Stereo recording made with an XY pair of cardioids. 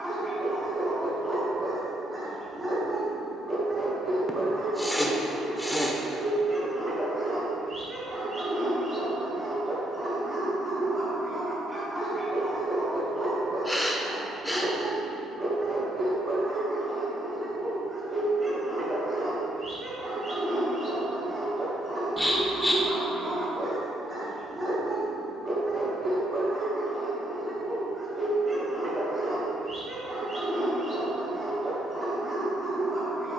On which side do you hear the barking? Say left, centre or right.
right.